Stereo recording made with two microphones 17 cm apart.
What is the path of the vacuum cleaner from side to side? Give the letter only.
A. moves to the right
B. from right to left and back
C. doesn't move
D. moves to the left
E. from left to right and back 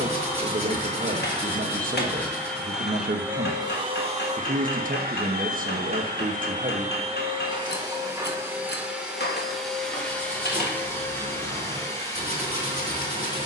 E.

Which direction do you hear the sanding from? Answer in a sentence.
You can hear the sanding on the right.